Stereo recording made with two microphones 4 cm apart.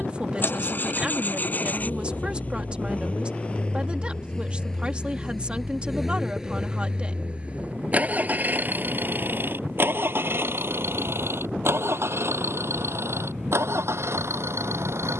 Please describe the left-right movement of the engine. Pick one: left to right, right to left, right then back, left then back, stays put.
left to right.